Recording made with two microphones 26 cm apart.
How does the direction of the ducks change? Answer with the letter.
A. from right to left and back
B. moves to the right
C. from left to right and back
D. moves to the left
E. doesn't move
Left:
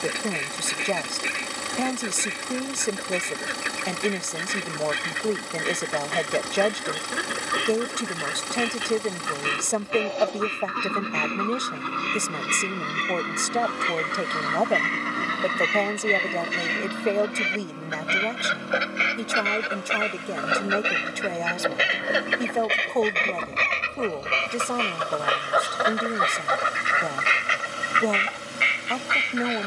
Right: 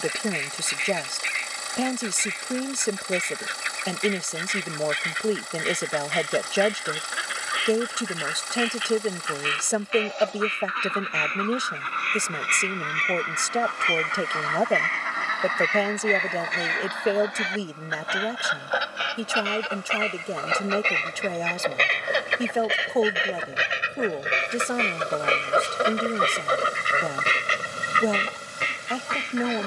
B.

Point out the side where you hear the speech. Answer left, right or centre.
centre.